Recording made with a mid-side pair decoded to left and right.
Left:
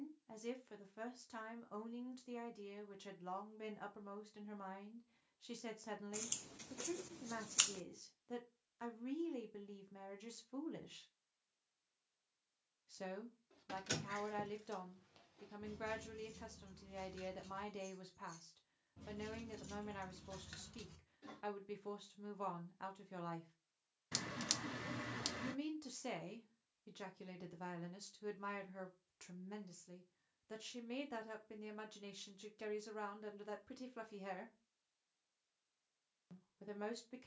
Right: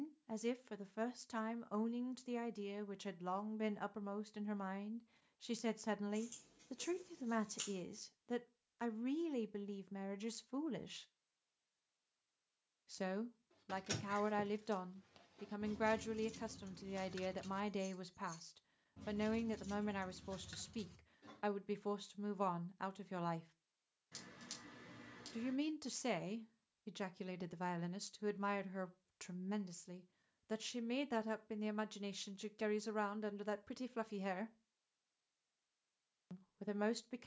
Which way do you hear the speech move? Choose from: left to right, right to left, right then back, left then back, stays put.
stays put.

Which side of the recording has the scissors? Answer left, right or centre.
left.